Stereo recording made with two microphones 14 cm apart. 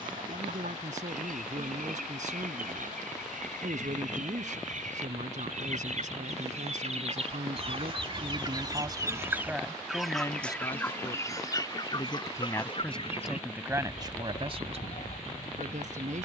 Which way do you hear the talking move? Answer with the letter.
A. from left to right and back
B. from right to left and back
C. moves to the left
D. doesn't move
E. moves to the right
B.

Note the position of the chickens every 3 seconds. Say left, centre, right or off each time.
right, right, right, centre, left, left.